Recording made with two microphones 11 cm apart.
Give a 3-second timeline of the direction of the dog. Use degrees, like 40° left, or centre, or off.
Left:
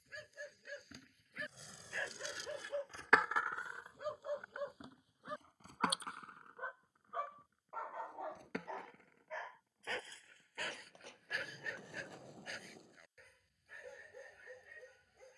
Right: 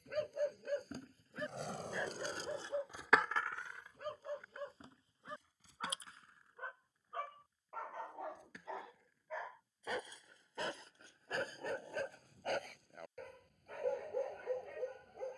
30° right, 10° left, 10° left, 30° right, 50° right.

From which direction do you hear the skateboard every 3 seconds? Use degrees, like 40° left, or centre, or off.
50° right, 30° left, 60° left, 70° left, 70° left.